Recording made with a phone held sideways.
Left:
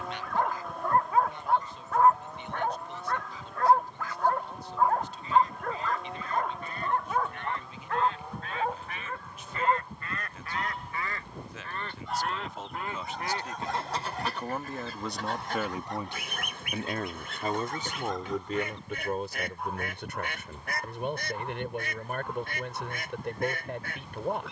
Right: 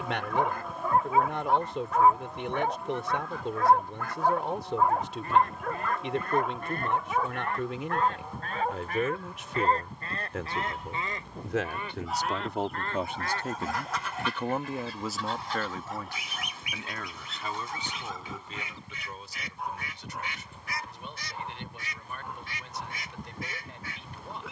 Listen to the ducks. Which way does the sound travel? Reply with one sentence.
You can hear the ducks move from right to left.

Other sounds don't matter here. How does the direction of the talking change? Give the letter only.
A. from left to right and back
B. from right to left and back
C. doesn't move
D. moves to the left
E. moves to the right
D.